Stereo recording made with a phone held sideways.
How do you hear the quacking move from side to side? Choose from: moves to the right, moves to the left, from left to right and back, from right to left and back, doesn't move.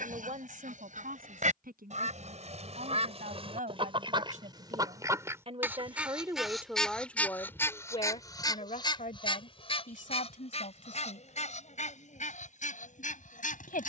moves to the left.